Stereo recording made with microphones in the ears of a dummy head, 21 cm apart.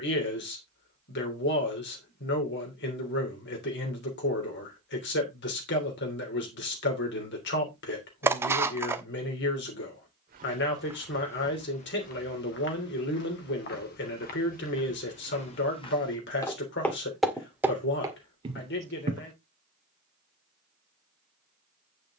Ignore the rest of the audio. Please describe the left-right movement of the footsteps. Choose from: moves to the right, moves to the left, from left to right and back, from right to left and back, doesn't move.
from right to left and back.